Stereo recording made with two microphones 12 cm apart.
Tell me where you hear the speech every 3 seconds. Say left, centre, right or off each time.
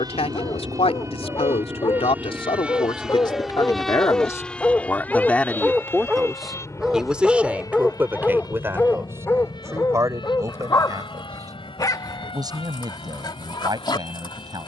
left, left, centre, right, right.